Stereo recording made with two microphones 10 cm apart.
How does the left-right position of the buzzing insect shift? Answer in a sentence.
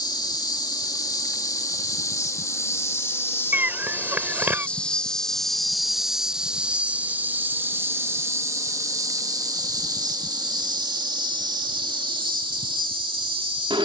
In this clip you hear the buzzing insect go from the left side to the right.